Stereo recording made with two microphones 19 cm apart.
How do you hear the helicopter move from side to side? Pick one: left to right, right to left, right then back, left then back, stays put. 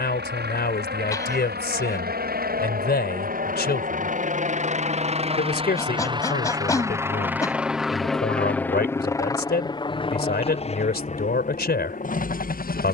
right to left.